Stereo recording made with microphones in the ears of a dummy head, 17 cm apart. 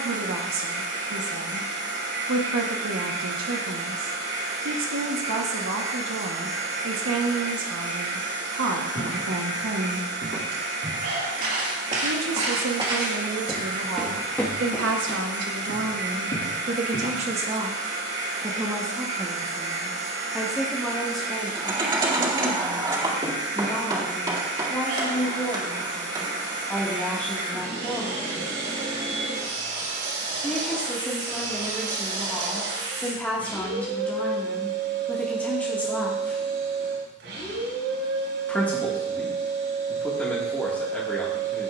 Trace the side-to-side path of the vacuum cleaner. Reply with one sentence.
You can hear the vacuum cleaner stay in one place.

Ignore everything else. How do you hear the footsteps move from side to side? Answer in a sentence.
In this clip you hear the footsteps go from the right side to the left.